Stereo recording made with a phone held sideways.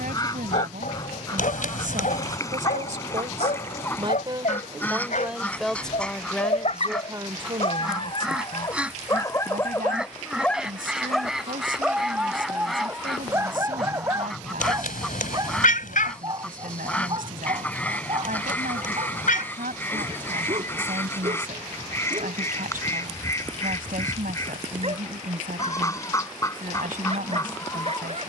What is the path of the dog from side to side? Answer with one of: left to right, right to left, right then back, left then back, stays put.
left to right.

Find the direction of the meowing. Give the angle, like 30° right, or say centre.
80° left.